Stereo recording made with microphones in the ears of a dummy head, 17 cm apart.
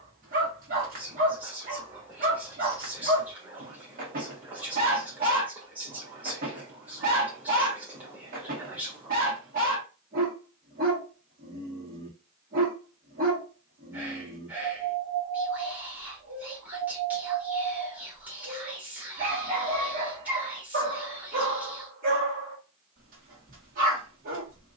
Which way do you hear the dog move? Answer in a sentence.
You can hear the dog stay put.